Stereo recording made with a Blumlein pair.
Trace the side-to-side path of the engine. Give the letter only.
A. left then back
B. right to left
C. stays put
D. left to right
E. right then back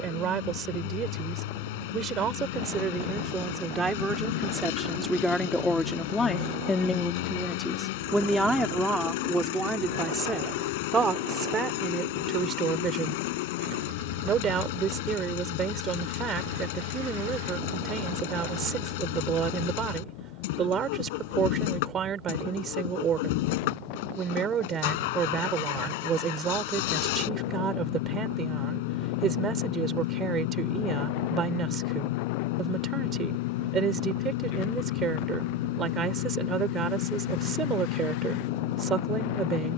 C.